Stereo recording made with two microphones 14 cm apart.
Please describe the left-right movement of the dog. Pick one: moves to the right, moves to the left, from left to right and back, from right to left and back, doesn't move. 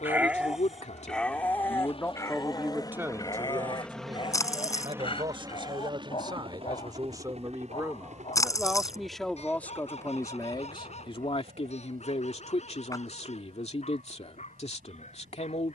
moves to the left.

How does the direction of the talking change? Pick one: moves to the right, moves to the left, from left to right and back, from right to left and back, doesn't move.
from left to right and back.